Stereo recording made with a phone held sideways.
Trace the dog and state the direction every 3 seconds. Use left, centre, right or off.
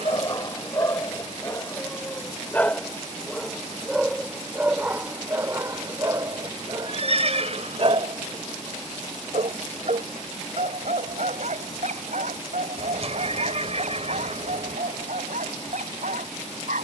left, centre, right, right, right, right.